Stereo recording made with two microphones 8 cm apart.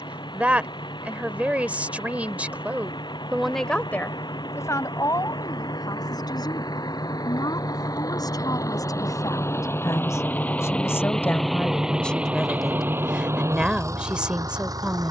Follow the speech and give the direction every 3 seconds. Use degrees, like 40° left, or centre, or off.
20° right, 40° left, 60° left, 40° left, 10° right.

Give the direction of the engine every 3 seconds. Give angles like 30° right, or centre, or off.
70° left, 70° left, 50° left, 20° left, 40° right.